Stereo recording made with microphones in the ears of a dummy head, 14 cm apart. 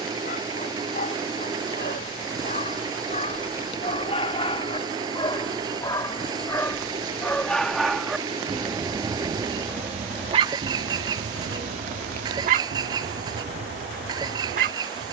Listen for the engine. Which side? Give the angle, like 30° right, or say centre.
30° right.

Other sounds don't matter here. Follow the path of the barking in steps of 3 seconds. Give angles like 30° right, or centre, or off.
50° left, 30° left, 10° left, 30° right, 60° right.